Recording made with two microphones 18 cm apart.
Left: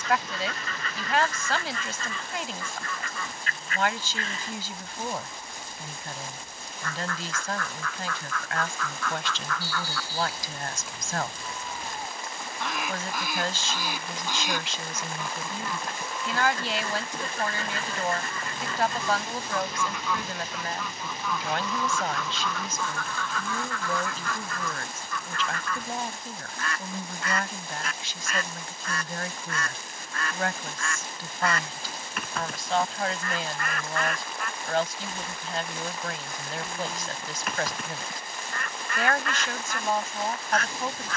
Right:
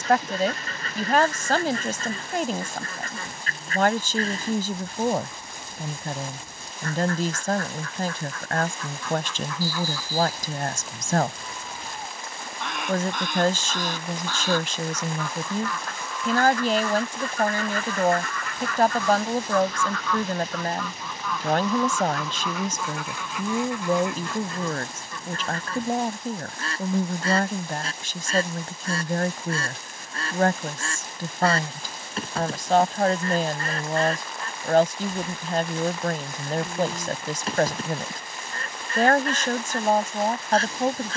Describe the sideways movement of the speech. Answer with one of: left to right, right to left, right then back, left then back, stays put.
stays put.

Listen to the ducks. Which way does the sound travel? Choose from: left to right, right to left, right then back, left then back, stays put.
left then back.